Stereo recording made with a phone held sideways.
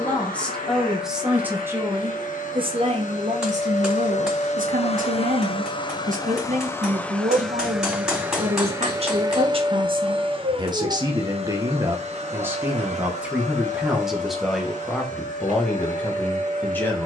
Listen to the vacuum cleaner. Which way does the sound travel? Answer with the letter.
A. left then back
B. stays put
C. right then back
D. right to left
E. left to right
E.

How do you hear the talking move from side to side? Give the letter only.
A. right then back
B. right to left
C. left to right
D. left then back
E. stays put
A.